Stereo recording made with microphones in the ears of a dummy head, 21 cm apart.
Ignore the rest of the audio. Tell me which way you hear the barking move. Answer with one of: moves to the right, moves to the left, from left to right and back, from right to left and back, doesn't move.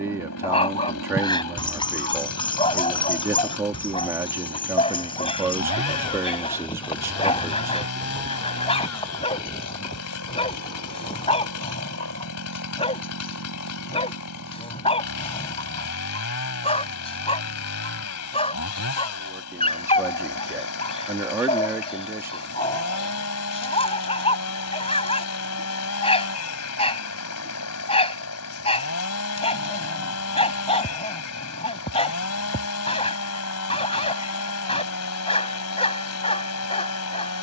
doesn't move.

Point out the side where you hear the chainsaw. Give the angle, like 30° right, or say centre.
70° left.